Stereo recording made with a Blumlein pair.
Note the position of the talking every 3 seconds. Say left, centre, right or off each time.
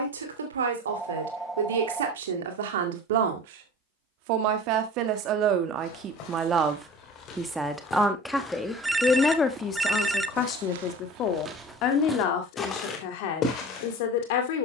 right, right, centre, left, left.